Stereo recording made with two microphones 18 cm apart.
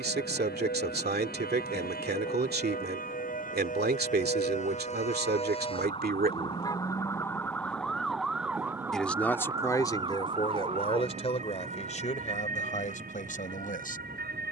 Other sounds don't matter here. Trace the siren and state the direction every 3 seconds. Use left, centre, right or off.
left, left, centre, right, right.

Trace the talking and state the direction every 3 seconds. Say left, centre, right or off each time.
right, right, right, left, left.